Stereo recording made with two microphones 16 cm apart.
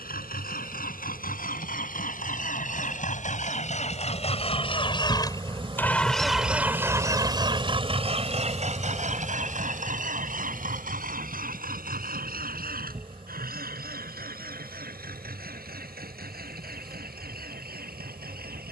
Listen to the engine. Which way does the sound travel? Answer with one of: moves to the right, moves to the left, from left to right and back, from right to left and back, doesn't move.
moves to the right.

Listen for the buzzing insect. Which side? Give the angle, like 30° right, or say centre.
40° right.